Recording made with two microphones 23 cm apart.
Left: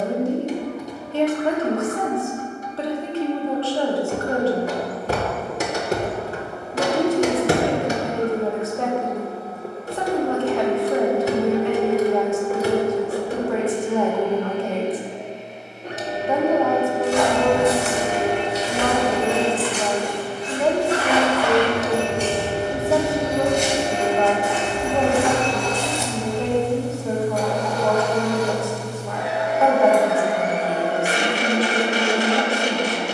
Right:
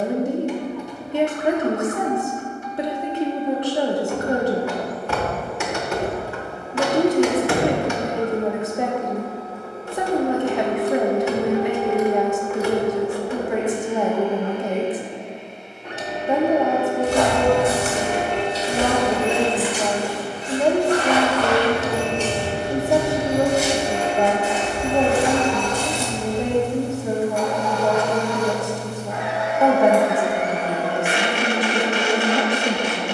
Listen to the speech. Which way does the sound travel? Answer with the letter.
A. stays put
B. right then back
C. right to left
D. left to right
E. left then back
A.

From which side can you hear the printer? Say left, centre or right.
left.